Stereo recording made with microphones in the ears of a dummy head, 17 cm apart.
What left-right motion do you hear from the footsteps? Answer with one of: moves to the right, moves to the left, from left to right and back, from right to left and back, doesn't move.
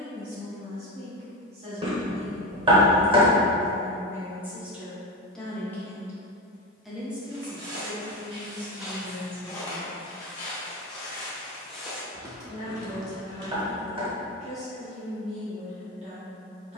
from right to left and back.